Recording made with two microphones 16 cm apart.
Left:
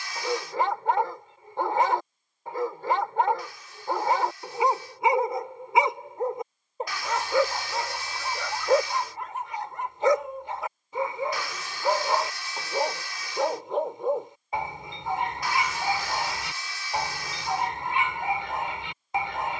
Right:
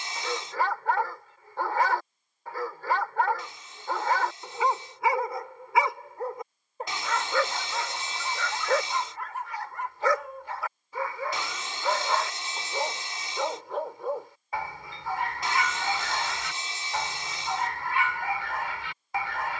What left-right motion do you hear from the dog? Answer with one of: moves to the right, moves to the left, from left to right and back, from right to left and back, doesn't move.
doesn't move.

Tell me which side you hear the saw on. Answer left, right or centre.
right.